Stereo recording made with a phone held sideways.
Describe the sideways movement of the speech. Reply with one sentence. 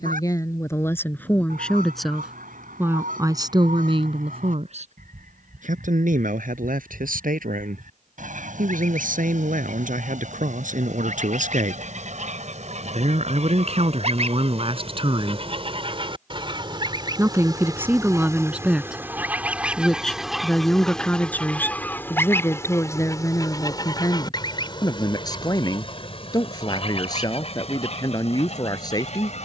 You can hear the speech move from left to right and back again.